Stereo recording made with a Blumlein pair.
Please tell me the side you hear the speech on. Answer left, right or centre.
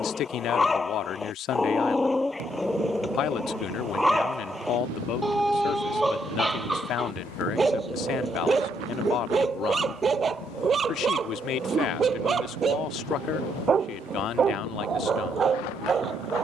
left.